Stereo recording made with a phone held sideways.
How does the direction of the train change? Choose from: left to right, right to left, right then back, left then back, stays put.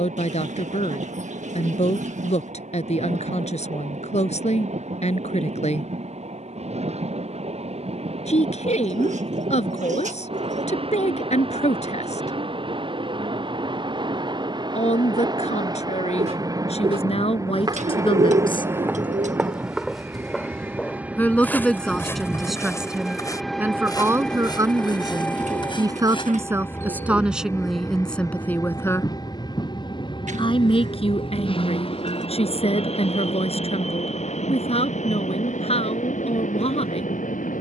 right to left.